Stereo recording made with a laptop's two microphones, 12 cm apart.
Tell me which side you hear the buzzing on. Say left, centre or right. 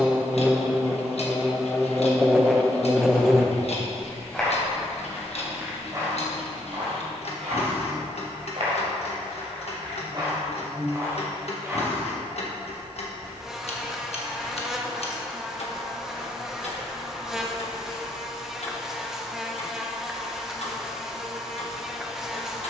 centre.